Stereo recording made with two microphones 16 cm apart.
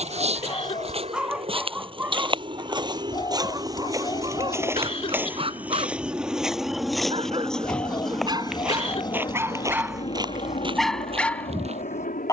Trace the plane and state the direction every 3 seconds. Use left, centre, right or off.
right, right, centre, left.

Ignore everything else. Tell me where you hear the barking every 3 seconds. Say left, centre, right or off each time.
centre, right, right, centre.